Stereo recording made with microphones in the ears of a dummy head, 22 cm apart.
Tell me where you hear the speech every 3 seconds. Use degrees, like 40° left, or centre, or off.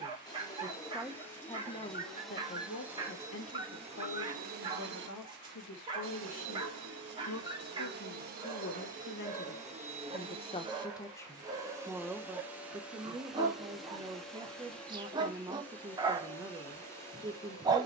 20° left, 70° left, 60° left, 20° left, 20° right, 20° right.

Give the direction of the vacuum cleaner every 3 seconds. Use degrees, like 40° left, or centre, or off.
10° left, 30° right, 50° right, 20° right, centre, 10° left.